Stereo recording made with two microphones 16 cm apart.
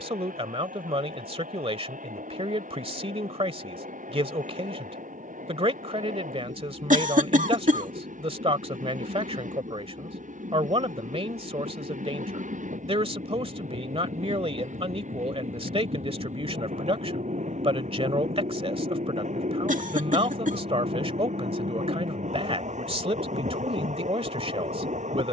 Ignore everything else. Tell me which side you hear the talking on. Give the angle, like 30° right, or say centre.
40° right.